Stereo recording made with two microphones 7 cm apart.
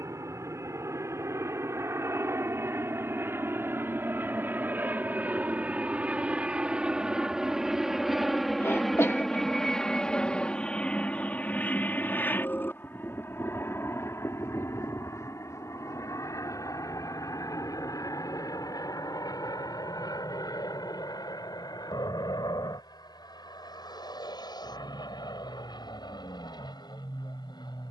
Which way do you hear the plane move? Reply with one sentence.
In this clip you hear the plane travel towards the left.